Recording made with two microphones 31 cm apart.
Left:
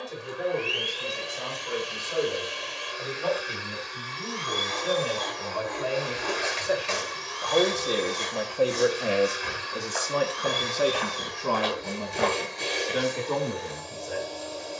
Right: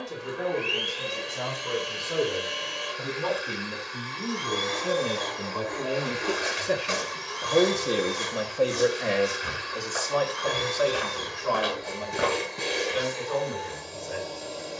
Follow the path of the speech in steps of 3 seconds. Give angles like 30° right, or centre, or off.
70° right, 60° right, 20° right, 30° left, 60° left.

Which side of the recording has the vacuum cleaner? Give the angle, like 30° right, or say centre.
60° right.